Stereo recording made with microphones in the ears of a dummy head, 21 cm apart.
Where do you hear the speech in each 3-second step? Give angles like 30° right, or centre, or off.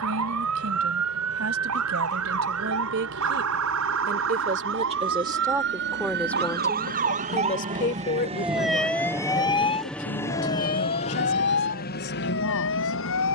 60° right, 30° right, 30° left, 60° left, 70° left.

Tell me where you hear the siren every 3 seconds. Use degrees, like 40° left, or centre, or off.
80° right, 60° right, 30° right, 30° left, 60° left.